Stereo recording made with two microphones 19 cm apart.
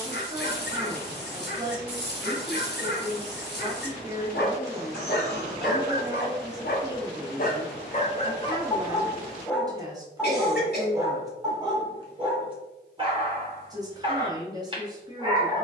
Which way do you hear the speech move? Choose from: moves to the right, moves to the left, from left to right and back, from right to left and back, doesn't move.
doesn't move.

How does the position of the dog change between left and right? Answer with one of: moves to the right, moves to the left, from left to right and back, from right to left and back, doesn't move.
moves to the right.